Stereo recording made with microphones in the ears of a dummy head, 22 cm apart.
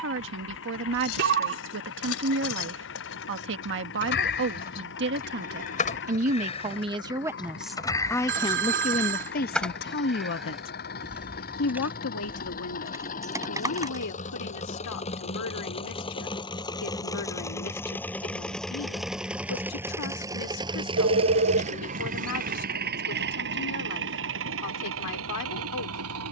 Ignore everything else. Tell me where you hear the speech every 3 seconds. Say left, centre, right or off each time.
right, right, centre, left, left, left, left, left, left.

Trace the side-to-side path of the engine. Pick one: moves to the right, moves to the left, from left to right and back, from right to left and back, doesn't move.
moves to the right.